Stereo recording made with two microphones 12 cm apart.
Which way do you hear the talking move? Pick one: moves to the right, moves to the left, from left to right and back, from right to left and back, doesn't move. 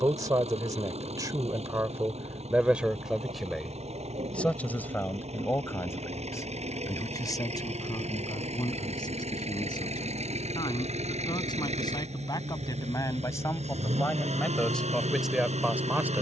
from right to left and back.